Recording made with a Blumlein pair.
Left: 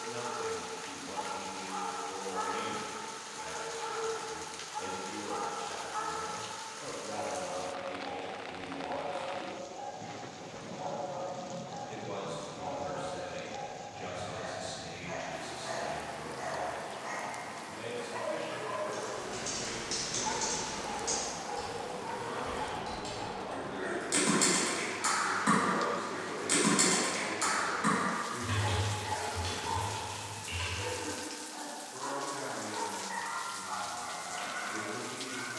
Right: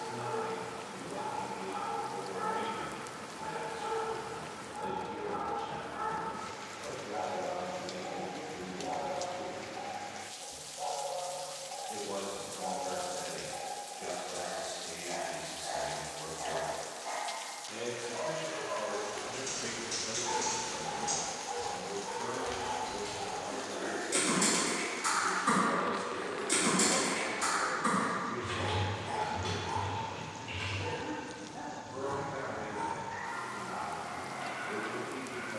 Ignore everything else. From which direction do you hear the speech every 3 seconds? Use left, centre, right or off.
left, left, left, left, left, centre, right, right, right, right, right, right.